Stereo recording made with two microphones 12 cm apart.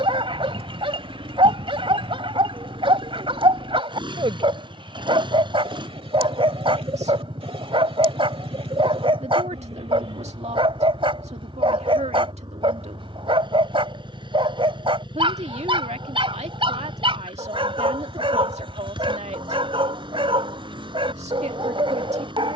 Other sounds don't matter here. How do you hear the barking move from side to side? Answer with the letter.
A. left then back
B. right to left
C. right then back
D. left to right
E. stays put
E.